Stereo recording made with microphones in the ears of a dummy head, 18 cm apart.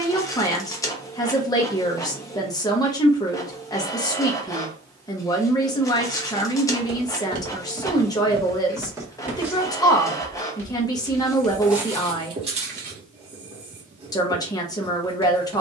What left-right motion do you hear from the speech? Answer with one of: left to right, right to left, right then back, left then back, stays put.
stays put.